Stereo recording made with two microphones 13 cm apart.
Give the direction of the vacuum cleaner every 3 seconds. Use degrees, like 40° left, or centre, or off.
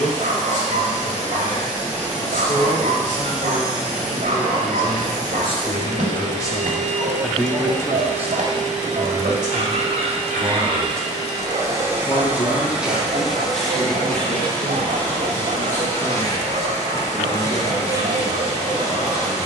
80° right, 80° right, 70° right, 40° right, centre, 20° left, 20° left.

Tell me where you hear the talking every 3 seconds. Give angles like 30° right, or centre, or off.
70° left, 60° left, 10° left, 30° right, 60° left, 70° left, 70° left.